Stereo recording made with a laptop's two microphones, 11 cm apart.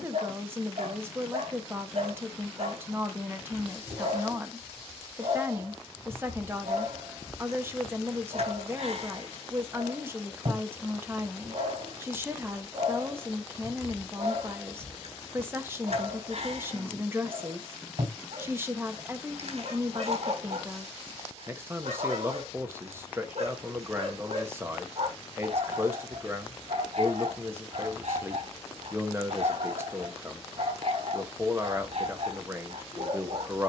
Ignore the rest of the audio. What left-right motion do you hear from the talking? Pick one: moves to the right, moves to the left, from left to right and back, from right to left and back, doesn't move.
doesn't move.